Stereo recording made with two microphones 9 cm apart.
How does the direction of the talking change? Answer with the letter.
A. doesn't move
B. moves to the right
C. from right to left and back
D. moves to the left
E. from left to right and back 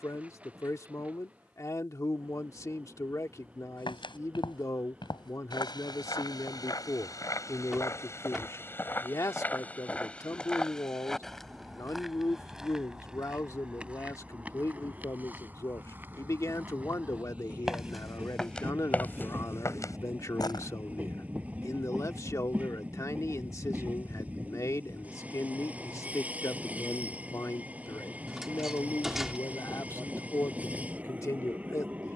A.